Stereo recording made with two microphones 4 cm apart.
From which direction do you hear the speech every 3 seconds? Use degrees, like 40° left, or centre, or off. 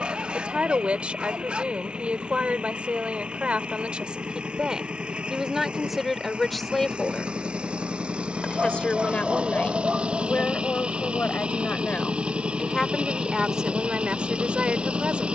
30° right, 20° right, 10° left, 30° left, 10° right.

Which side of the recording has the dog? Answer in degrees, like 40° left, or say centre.
20° right.